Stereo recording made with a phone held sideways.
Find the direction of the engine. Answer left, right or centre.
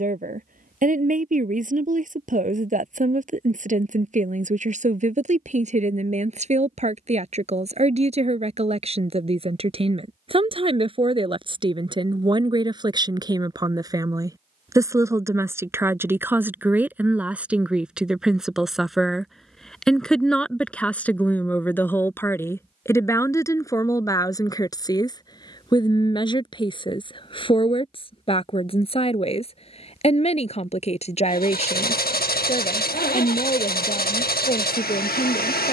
left.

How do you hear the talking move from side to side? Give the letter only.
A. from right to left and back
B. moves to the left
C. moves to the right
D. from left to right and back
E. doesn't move
B.